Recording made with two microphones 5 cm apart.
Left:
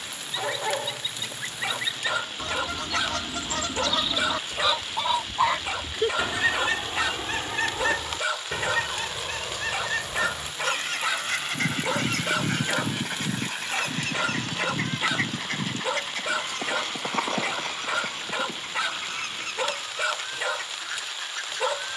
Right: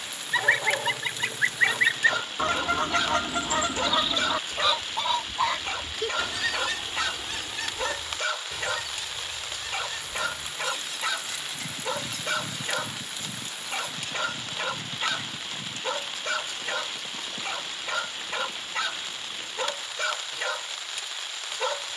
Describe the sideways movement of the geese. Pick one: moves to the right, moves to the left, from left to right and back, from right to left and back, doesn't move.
moves to the left.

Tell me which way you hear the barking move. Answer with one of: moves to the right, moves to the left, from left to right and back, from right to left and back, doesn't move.
doesn't move.